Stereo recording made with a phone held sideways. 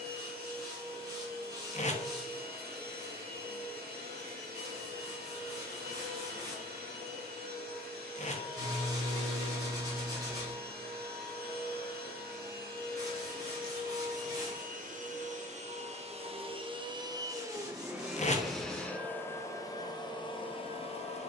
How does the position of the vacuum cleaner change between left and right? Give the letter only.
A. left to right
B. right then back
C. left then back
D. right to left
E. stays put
D.